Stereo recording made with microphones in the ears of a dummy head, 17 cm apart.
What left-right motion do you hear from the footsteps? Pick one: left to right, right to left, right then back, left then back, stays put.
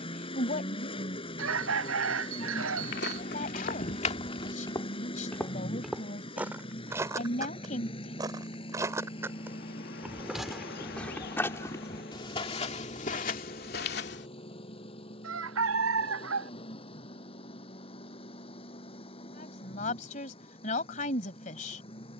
right then back.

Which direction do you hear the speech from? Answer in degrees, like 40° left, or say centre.
40° left.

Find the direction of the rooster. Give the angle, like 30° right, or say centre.
80° right.